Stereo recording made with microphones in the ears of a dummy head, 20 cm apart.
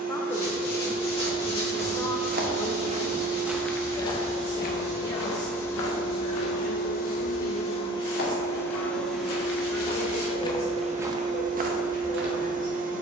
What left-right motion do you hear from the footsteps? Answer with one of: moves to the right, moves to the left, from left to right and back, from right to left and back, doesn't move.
from right to left and back.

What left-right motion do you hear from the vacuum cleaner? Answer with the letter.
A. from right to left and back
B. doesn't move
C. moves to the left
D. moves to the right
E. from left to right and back
A.